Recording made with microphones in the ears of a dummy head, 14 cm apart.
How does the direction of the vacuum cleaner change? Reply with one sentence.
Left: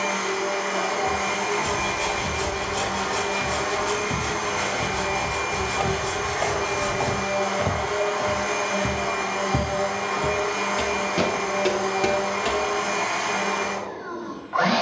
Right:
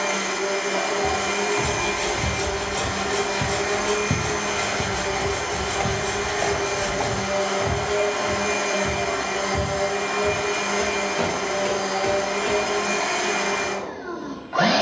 You can hear the vacuum cleaner stay put.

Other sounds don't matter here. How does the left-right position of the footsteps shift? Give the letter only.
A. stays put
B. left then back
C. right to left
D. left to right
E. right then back
C.